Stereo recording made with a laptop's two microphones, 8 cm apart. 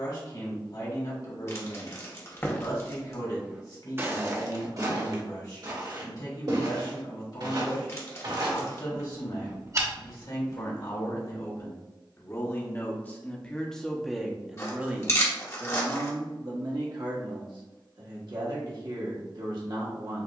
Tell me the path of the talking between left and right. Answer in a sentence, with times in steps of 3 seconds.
In this clip you hear the talking on the left from 0 s, in the centre from 12 s and on the right from 15 s.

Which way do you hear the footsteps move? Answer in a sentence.
You can hear the footsteps move from left to right and back again.